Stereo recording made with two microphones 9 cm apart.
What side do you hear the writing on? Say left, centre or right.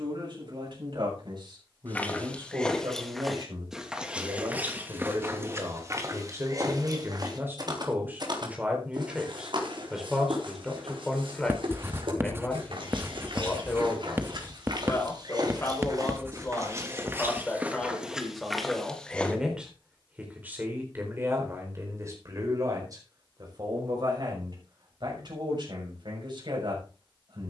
right.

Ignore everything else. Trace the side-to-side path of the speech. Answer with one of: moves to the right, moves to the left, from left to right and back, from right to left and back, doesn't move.
from right to left and back.